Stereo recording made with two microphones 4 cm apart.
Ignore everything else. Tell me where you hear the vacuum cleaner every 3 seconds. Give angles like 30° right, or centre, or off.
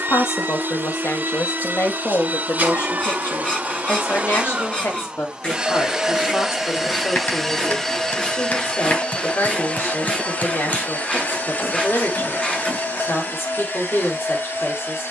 50° right, 30° right, 10° left, 50° left, 60° left.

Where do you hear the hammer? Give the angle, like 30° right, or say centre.
50° left.